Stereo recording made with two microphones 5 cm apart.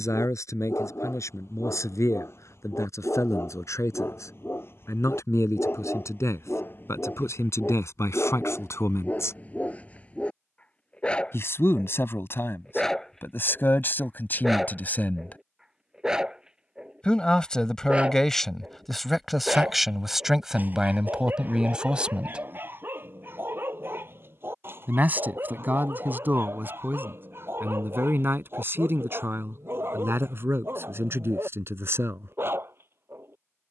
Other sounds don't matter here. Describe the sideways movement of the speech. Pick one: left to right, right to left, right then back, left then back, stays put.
left to right.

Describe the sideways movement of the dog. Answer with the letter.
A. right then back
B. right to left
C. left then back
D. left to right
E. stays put
D.